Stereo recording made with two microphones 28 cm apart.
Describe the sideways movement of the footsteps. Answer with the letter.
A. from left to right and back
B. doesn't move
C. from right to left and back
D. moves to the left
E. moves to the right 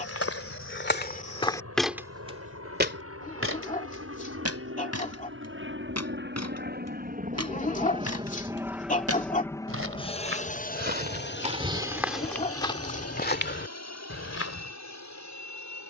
A.